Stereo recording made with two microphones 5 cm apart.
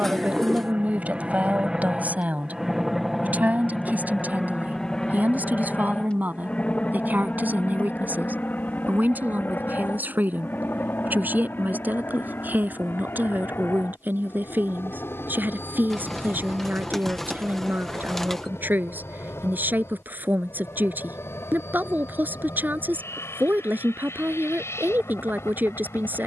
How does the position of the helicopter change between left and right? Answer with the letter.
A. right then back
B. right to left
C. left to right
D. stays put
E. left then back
B.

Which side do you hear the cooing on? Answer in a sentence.
In this clip you hear the cooing in the centre.